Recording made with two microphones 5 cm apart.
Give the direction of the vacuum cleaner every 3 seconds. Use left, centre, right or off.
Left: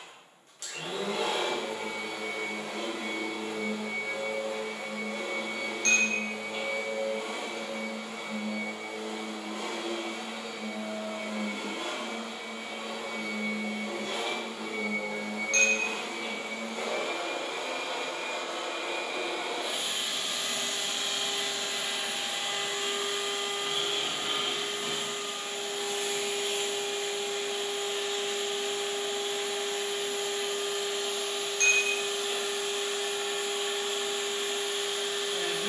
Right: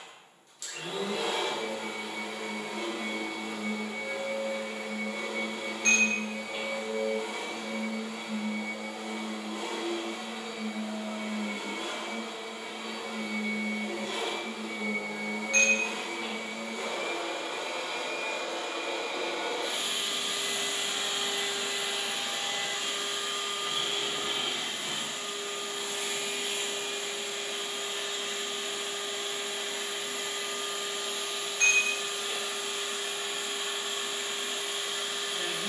left, left, left, left, left, left, centre, centre, left, left, left, left.